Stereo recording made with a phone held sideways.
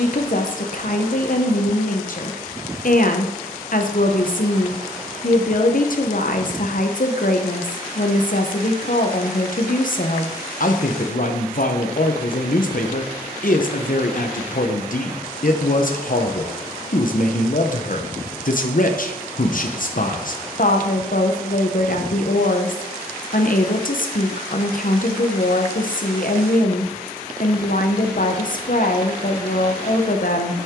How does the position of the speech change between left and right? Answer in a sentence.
You can hear the speech stay in one place.